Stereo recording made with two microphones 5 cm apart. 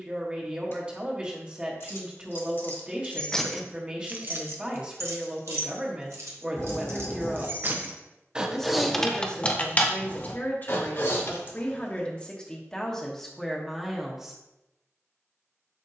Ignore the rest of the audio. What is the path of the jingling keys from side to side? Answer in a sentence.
You can hear the jingling keys move from left to right and back again.